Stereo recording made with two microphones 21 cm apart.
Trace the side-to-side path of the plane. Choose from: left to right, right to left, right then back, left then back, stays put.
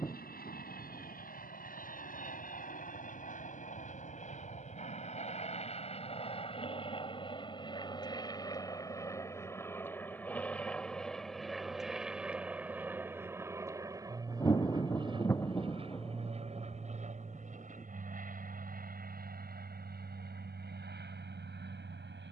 left to right.